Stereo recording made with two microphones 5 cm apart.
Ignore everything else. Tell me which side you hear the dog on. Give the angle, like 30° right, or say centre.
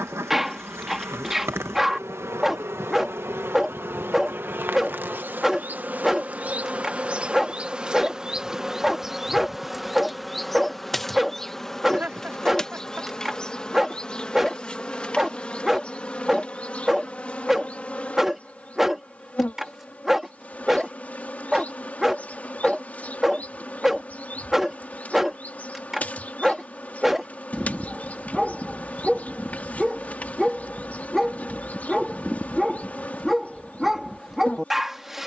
10° right.